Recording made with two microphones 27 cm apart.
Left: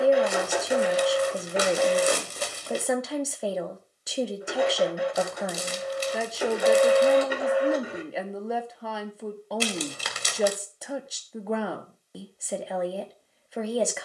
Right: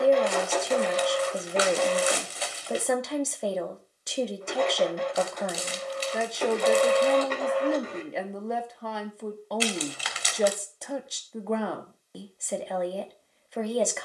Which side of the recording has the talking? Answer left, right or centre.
centre.